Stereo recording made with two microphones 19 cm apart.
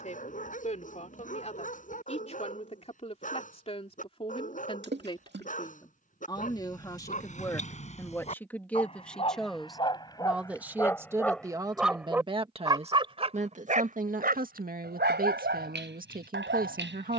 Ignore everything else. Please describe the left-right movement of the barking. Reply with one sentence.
You can hear the barking move from left to right.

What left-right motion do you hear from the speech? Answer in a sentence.
In this clip you hear the speech go from the left side to the right.